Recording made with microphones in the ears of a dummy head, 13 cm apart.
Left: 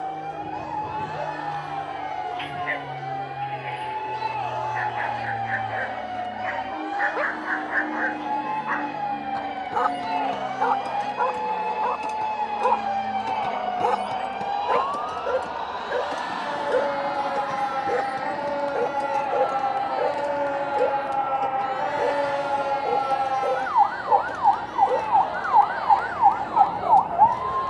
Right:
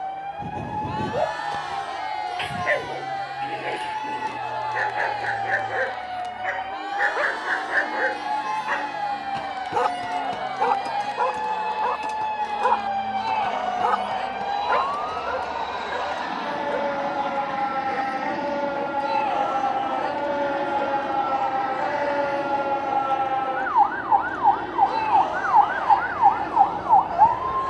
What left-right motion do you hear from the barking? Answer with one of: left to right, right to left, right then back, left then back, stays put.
right to left.